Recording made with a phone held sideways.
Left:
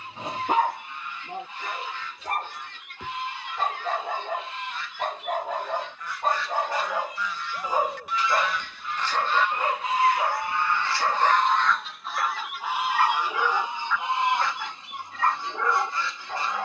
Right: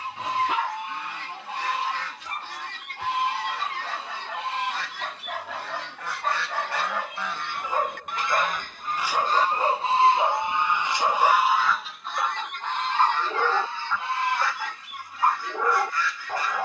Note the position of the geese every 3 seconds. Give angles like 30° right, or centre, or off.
80° right, 80° right, 60° right, 20° right, 10° left, 20° left.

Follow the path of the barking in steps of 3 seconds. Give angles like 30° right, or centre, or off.
50° left, 40° left, 10° left, 20° right, 20° right, 20° right.